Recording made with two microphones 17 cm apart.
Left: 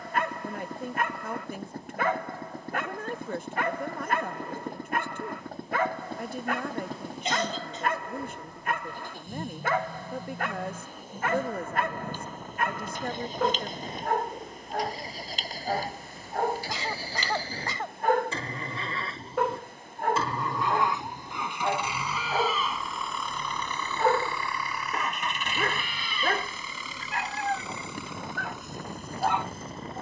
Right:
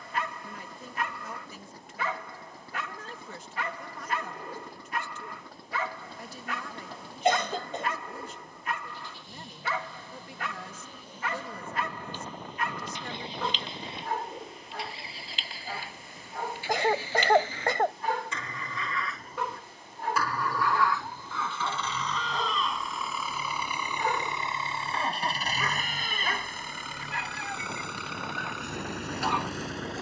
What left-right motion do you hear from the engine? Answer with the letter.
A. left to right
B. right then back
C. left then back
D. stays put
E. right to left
A.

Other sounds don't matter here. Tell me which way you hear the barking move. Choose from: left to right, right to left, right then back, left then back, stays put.
stays put.